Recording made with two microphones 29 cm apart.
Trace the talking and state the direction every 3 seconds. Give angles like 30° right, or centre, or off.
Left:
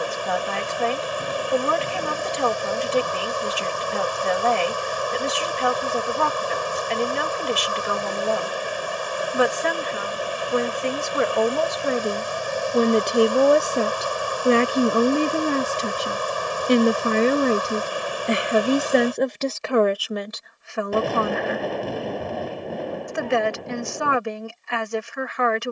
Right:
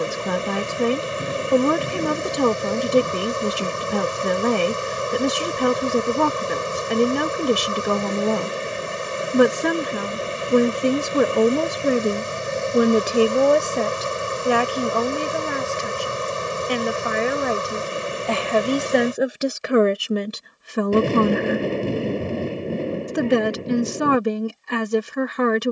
50° right, 50° right, 50° right, 40° right, centre, 40° left, 10° right, 40° right, 40° right.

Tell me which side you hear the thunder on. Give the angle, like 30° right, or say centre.
30° right.